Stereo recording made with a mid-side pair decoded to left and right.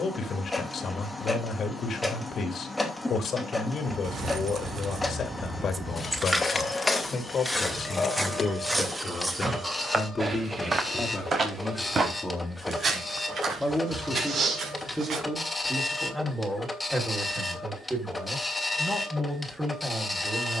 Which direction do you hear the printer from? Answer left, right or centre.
centre.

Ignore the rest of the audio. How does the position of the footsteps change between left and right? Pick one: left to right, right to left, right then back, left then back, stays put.
left to right.